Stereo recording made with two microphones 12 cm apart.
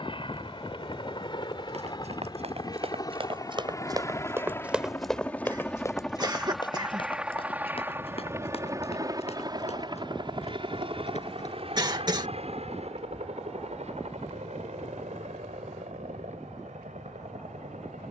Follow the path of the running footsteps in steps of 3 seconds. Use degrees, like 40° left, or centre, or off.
60° right, 20° right, 50° left, 60° left, off, off.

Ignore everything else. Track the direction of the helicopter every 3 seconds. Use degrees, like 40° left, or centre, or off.
40° left, 20° left, 10° right, 40° right, 60° right, 70° right.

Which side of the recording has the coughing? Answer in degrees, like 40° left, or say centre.
40° right.